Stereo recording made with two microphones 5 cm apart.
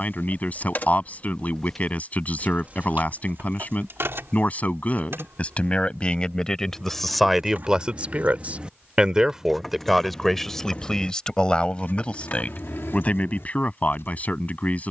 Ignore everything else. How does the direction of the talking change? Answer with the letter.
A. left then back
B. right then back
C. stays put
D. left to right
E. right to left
B.